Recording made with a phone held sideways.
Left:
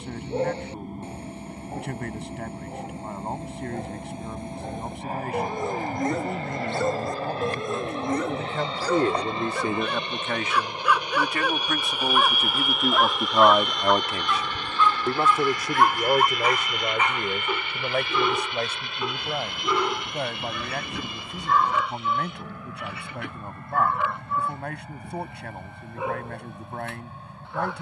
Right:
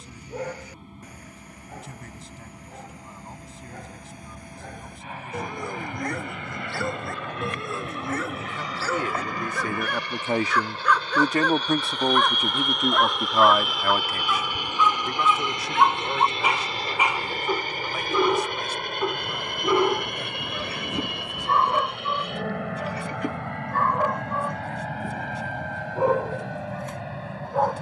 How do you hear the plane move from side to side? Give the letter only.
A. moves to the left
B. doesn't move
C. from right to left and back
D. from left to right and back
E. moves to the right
E.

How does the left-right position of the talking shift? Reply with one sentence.
You can hear the talking move from left to right and back again.